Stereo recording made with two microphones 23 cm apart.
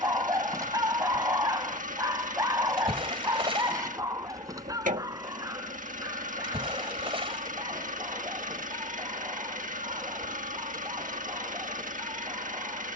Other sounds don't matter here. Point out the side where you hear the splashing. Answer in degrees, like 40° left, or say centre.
20° right.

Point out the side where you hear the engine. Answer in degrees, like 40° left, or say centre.
40° right.